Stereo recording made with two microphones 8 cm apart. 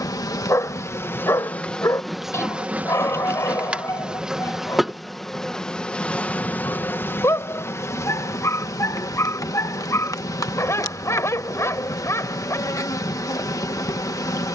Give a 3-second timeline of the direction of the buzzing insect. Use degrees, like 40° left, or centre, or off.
20° left, centre, 30° left, 40° left, 40° left.